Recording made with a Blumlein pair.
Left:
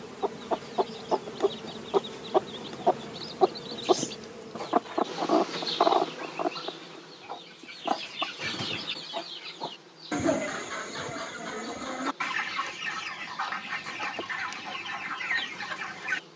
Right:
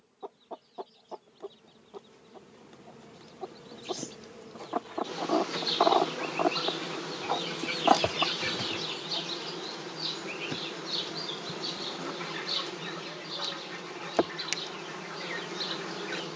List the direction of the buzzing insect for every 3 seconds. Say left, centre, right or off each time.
left, centre, right, right, right, right.